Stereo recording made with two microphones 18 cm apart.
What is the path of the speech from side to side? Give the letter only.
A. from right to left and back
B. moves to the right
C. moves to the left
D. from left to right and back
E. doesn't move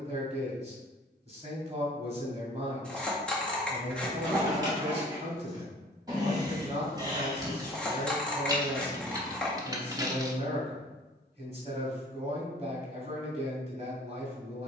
E.